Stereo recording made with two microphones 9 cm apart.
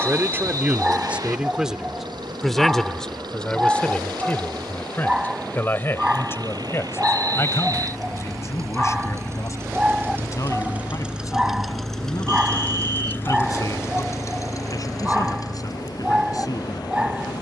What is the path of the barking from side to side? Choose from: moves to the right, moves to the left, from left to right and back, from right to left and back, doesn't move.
doesn't move.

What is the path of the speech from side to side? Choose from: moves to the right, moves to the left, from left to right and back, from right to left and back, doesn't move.
moves to the left.